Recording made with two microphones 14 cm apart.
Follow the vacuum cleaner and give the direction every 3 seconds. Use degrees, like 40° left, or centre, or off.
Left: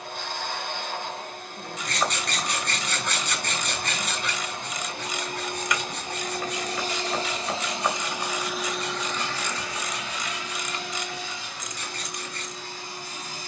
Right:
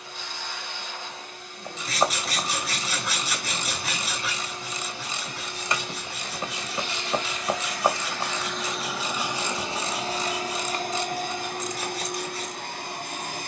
60° left, 60° left, 30° left, 40° right, 70° right.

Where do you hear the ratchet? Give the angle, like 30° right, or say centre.
30° right.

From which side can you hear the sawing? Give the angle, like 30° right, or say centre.
centre.